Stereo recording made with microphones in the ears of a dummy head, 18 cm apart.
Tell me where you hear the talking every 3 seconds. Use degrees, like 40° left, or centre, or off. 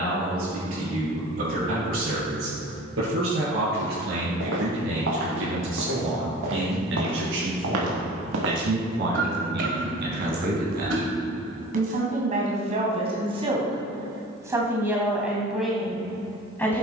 80° right, 80° right, 70° right, 50° right, 30° right, centre.